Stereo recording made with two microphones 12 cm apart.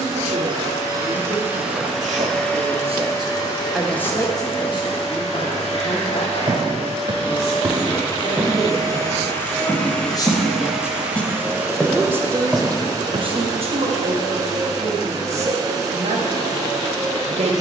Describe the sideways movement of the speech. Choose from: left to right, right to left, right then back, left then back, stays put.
left then back.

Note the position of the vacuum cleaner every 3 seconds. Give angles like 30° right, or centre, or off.
10° right, 40° left, 40° left, centre, 30° right, 30° right.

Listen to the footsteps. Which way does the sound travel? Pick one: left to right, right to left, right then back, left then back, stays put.
left then back.